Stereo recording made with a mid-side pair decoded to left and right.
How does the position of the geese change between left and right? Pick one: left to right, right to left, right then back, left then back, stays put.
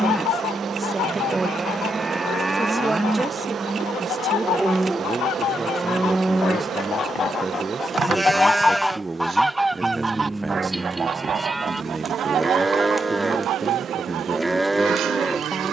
left to right.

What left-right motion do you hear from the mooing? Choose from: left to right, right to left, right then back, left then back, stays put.
stays put.